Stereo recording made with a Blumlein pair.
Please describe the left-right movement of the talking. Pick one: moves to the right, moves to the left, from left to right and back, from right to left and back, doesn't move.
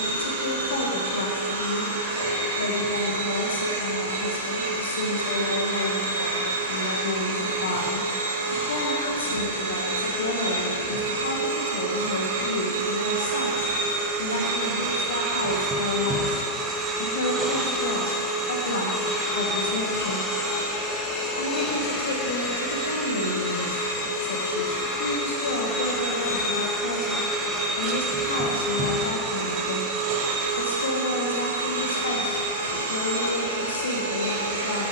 doesn't move.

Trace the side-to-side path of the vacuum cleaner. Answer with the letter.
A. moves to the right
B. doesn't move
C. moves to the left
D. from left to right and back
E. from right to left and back
E.